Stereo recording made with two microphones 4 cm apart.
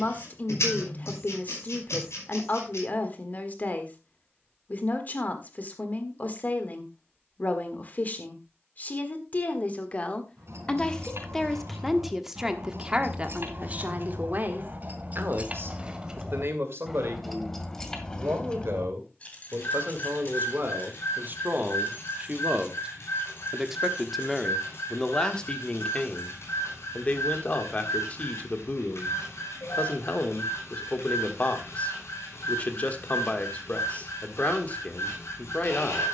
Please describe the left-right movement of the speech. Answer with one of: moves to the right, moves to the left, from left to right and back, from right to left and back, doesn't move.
from left to right and back.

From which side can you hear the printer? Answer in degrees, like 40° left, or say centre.
80° left.